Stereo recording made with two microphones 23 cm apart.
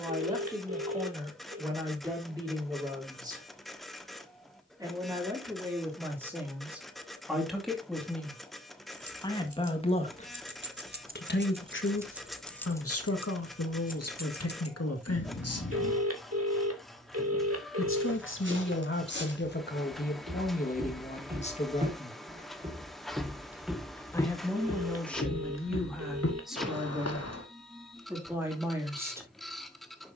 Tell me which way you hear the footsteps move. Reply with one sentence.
In this clip you hear the footsteps move to the left.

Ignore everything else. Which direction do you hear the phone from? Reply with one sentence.
You can hear the phone on the right.